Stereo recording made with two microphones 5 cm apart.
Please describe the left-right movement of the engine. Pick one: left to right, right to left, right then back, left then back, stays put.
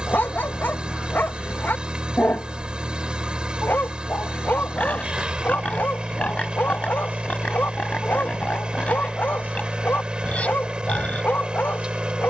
stays put.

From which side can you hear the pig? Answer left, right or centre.
left.